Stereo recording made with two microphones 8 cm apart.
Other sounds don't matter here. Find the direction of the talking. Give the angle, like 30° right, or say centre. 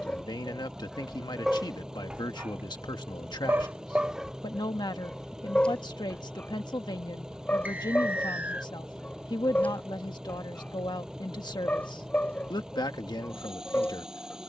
70° left.